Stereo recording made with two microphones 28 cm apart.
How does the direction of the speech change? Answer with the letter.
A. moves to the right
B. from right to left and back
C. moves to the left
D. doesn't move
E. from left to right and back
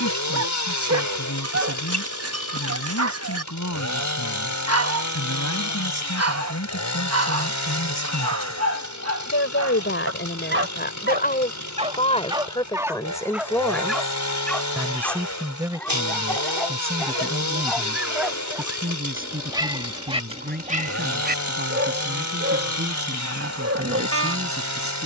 A.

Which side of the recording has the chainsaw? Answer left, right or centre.
left.